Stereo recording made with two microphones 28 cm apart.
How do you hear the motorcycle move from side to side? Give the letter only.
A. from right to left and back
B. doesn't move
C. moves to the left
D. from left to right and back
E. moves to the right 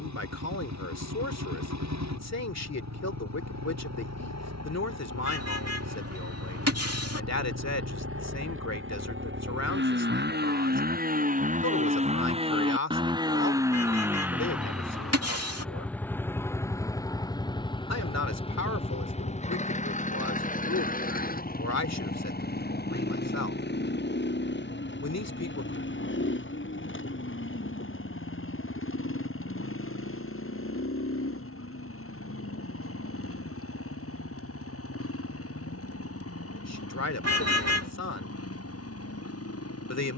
C.